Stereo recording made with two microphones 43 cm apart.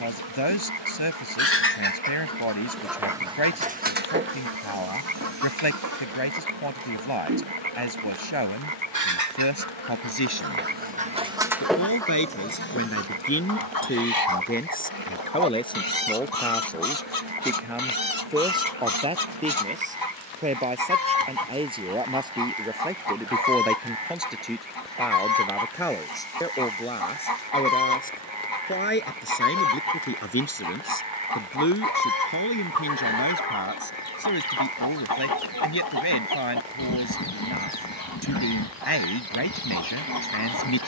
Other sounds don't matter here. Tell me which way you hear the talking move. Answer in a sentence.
You can hear the talking move from left to right and back again.